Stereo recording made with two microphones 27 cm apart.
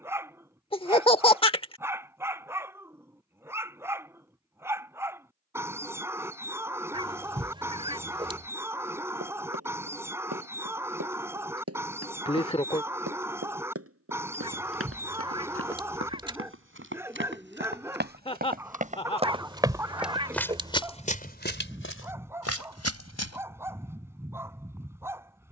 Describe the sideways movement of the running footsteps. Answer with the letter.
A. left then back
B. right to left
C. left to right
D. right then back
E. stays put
B.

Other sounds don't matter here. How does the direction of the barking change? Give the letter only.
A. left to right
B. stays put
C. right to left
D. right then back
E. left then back
B.